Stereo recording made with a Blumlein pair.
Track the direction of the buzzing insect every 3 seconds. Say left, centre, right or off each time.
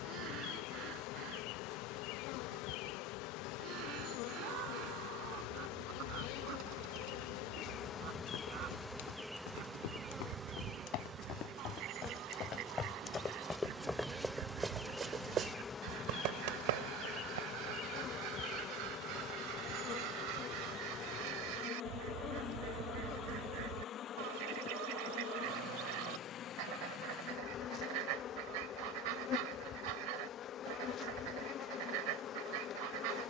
left, left, left, centre, centre, left, left, left, left, left, left.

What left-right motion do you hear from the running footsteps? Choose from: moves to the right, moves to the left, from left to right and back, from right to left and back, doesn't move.
moves to the right.